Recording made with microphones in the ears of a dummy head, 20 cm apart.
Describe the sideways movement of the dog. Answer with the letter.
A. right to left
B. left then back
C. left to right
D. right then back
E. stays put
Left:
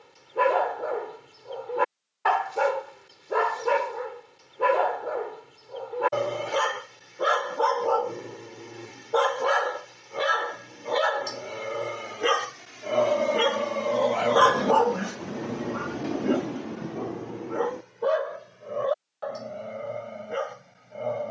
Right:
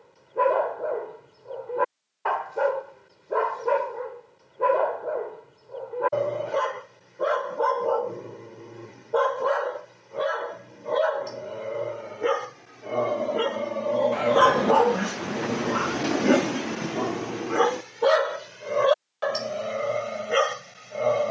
C.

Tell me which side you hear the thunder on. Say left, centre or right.
right.